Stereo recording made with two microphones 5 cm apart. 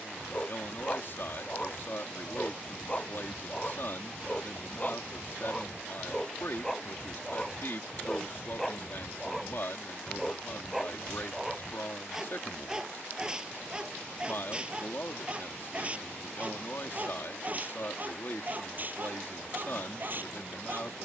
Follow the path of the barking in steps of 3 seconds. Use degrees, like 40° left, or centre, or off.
30° left, 20° left, 10° left, centre, 20° right, 30° right, 40° right.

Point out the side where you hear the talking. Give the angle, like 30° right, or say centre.
50° left.